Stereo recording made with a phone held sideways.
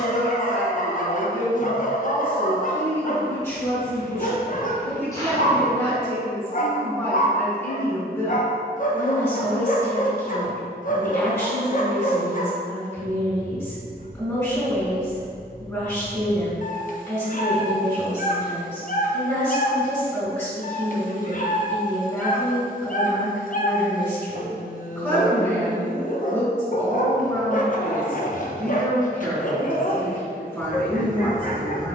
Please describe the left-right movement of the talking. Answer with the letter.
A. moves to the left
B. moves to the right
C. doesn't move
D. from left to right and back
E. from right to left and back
C.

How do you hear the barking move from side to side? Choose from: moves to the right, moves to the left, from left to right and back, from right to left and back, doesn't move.
doesn't move.